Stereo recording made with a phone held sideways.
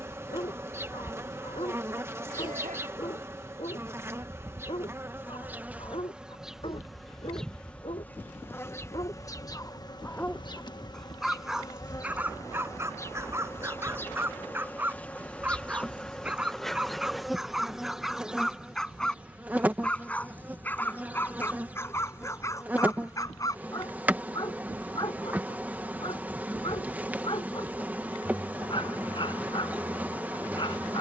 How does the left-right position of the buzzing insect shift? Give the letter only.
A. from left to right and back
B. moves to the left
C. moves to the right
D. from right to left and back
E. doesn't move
D.